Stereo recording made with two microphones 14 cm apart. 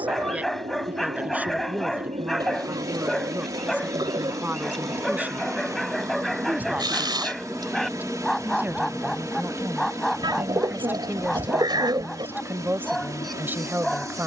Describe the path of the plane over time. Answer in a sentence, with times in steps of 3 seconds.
You can hear the plane on the right from 0 s, in the centre from 6 s and on the left from 9 s.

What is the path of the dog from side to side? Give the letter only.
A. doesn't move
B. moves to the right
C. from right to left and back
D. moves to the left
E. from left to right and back
A.